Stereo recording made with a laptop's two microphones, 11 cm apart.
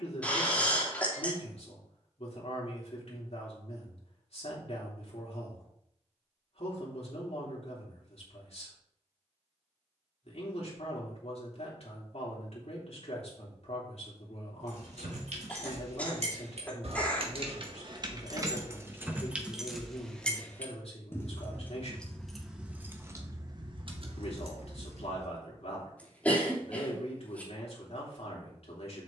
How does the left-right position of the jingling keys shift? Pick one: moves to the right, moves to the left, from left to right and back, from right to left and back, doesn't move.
from right to left and back.